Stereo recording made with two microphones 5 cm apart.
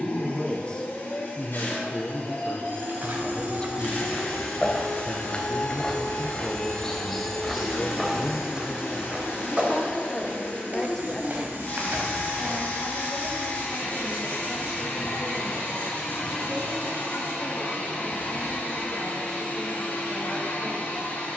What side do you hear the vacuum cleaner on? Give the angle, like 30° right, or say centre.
50° left.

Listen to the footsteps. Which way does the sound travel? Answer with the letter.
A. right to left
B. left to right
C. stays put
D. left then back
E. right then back
D.